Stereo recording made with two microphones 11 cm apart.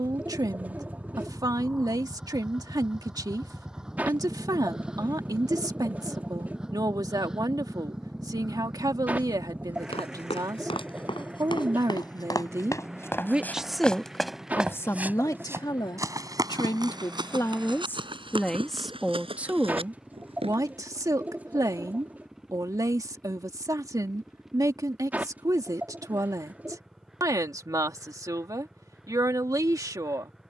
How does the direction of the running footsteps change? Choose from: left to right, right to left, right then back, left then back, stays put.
left to right.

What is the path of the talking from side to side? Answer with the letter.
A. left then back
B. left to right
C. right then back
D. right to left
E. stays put
A.